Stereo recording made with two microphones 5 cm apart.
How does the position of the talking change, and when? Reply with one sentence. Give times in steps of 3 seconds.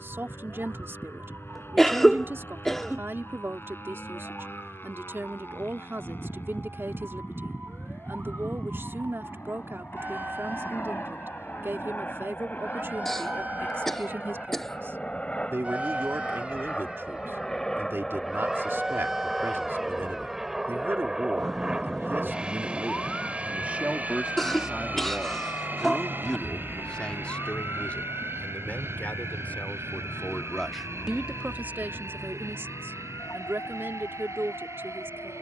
You can hear the talking on the right from 0 s, in the centre from 24 s, on the left from 27 s and on the right from 30 s.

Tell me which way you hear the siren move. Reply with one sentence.
You can hear the siren travel towards the left.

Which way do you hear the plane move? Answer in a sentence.
You can hear the plane move to the right.